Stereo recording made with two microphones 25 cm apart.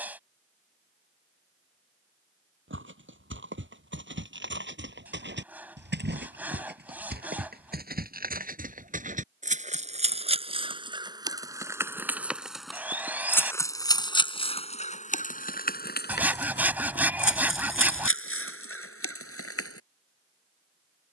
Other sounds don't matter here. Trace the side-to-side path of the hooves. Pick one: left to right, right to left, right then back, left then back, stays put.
right to left.